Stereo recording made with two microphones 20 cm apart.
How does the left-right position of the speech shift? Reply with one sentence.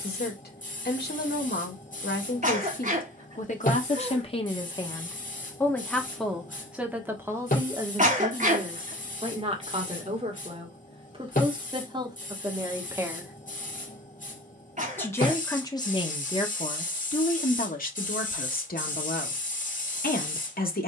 You can hear the speech go right and come back.